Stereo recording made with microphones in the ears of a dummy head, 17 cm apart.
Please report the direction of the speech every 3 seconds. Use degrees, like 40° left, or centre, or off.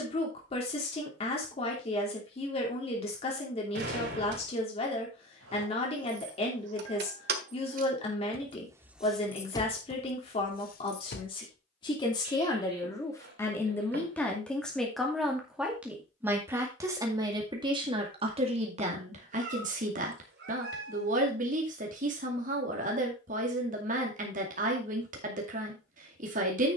30° left, 30° left, 30° left, 30° left, 10° left, 10° right, 40° right, 40° right, 40° right.